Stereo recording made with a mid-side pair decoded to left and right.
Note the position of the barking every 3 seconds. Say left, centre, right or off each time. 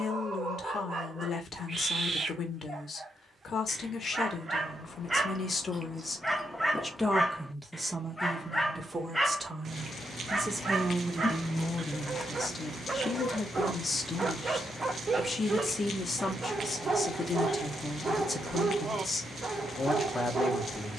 right, right, centre, right, right, right, right.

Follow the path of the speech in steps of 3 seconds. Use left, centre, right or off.
left, left, centre, centre, left, left, left.